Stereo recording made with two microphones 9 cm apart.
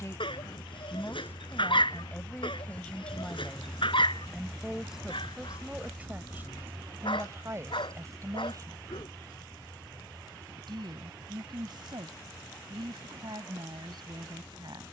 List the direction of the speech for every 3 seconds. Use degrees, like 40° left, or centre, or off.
20° left, centre, 30° right, 60° right, 60° right.